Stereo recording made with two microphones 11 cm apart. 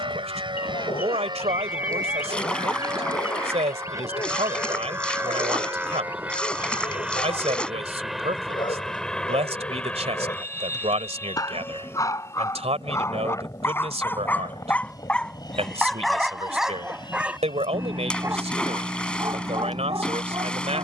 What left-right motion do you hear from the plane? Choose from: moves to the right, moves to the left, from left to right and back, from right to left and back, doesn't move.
moves to the left.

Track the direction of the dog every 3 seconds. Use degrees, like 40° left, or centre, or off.
60° left, 50° left, 50° left, 40° left, 20° left, centre, 30° right.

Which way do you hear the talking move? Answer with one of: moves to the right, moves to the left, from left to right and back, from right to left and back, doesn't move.
doesn't move.